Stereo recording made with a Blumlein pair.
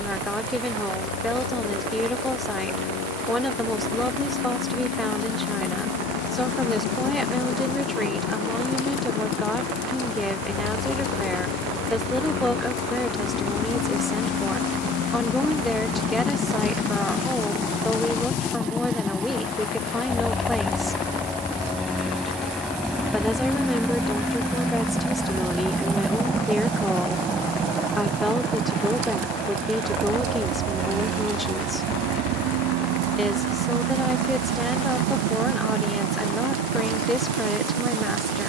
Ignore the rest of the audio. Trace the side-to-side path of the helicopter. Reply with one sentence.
You can hear the helicopter move to the right.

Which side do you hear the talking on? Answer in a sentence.
You can hear the talking in the centre.